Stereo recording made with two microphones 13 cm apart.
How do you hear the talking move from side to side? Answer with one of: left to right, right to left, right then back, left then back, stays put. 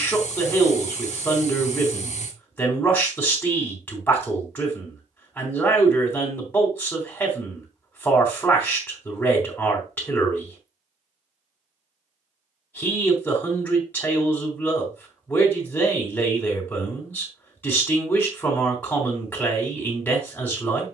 stays put.